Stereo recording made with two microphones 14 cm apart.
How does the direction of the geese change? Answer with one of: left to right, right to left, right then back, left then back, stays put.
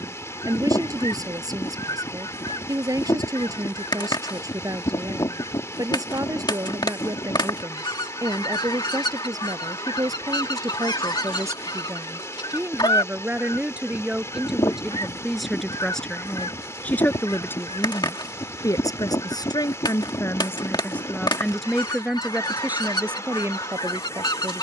stays put.